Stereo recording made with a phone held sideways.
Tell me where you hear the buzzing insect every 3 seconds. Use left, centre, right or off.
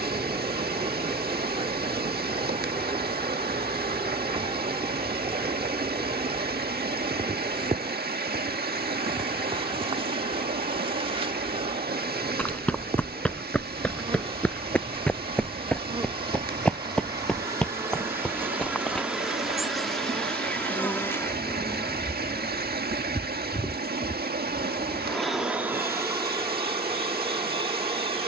right, right, right, right, right, right, centre, left, centre, right.